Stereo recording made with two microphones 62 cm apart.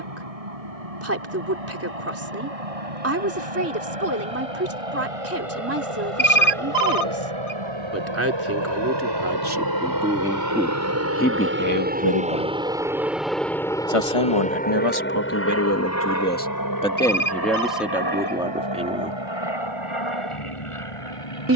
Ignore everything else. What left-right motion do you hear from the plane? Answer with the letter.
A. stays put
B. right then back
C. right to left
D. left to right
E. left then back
C.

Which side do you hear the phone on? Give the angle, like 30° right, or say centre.
70° left.